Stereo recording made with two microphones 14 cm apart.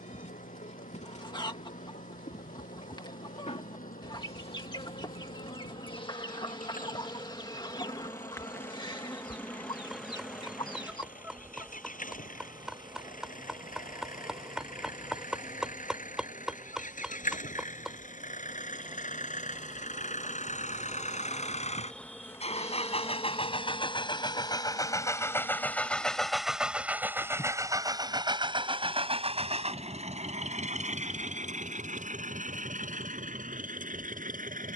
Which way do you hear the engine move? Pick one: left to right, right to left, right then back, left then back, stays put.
left to right.